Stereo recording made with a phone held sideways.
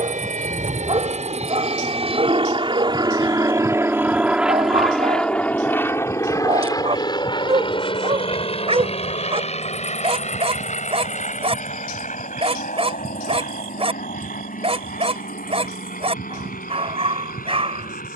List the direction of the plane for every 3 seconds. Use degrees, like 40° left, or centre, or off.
50° right, 10° right, 30° left, 50° left, 50° left, 60° left.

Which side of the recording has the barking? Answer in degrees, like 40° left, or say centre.
40° right.